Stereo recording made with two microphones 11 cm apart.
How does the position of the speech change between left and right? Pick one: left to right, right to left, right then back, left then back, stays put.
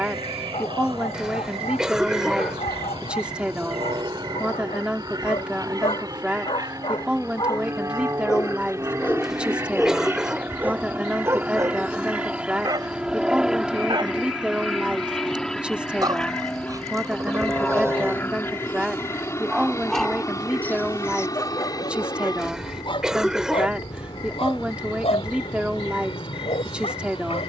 stays put.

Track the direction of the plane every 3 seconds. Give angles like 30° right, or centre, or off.
50° right, 40° right, 30° right, 20° right, 10° right, 10° left, 30° left, 40° left, 50° left.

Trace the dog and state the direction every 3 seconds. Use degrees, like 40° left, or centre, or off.
80° left, 80° left, 50° left, 10° right, 40° right, 30° right, centre, 40° left, 80° left.